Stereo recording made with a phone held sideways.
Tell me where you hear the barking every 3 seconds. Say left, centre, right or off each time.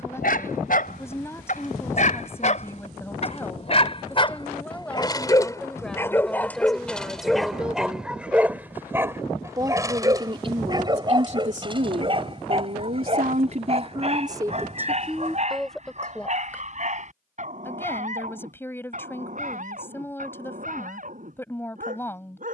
left, left, centre, right, right, right, right, right.